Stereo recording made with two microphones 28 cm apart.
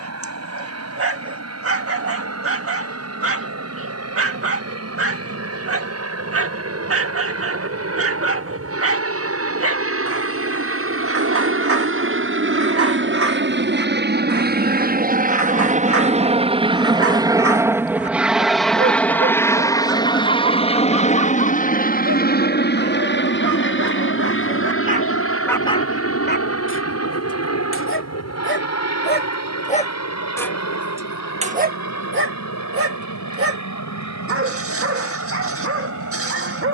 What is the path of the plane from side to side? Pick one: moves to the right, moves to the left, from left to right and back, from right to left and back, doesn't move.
moves to the left.